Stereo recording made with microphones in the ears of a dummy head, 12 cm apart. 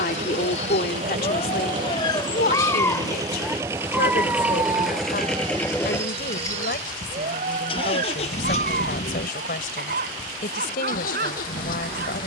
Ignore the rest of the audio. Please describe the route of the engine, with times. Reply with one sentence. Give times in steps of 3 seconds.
You can hear the engine on the right from 0 s, in the centre from 3 s and on the left from 6 s.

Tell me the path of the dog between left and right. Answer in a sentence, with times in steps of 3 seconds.
You can hear the dog on the left from 0 s and on the right from 3 s.